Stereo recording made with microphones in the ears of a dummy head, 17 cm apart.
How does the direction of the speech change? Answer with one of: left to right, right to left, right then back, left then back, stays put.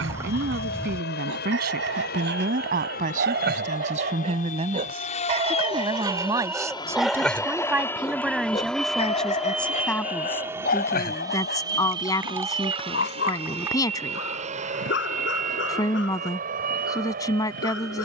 right to left.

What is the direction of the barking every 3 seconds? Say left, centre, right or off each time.
right, right, centre, left, left, left.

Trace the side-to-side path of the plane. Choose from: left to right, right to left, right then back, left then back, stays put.
left to right.